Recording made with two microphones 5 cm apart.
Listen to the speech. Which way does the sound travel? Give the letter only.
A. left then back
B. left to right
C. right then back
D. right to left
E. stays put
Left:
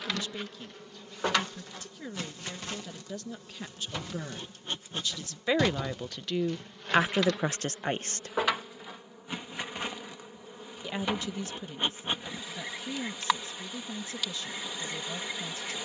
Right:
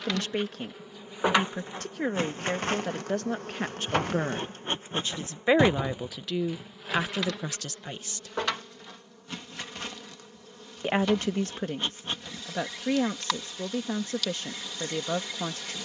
A.